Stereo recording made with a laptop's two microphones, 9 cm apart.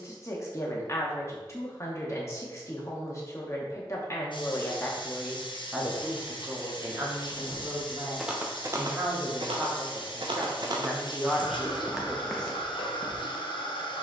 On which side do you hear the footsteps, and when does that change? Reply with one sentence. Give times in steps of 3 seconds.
You can hear the footsteps not at all from 0 s, in the centre from 6 s, on the right from 9 s and in the centre from 12 s.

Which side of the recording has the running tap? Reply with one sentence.
In this clip you hear the running tap on the left.